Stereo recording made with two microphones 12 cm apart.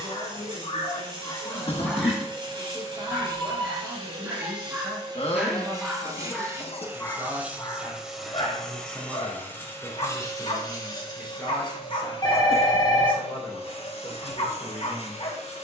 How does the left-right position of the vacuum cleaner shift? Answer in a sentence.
You can hear the vacuum cleaner travel towards the left.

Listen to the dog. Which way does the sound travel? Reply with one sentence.
In this clip you hear the dog move from left to right and back again.